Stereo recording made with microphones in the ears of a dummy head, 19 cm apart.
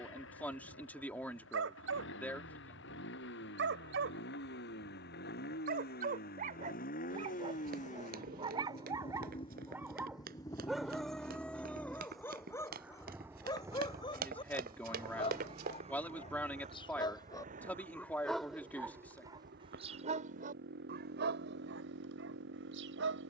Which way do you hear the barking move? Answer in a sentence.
In this clip you hear the barking go left and come back.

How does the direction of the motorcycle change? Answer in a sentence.
In this clip you hear the motorcycle travel towards the right.